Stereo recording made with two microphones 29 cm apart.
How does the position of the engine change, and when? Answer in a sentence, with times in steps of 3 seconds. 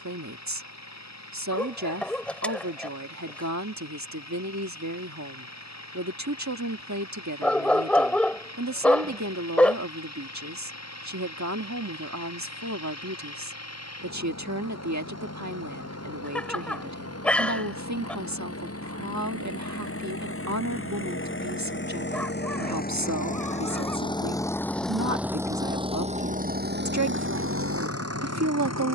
You can hear the engine on the left from 0 s, in the centre from 24 s and on the right from 27 s.